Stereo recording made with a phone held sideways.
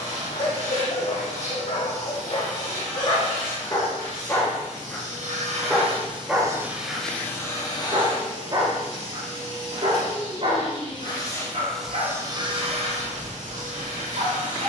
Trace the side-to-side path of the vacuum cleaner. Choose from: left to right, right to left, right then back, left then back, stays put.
left then back.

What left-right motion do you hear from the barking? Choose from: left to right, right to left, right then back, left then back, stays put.
left to right.